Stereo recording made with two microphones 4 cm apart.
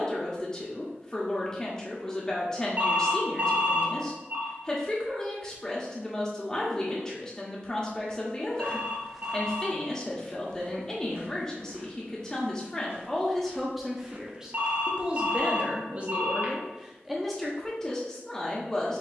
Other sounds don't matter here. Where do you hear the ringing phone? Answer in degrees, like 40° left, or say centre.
40° right.